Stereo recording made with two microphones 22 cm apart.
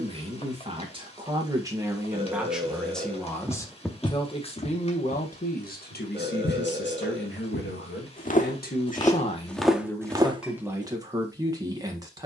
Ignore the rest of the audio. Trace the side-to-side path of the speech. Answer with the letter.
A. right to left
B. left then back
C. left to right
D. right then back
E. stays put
B.